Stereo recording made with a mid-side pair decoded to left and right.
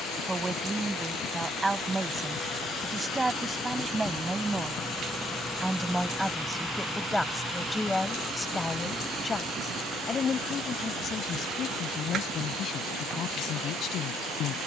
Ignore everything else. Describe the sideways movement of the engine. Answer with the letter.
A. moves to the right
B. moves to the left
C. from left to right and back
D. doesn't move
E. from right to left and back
A.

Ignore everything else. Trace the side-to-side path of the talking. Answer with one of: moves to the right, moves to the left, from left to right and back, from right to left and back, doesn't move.
moves to the left.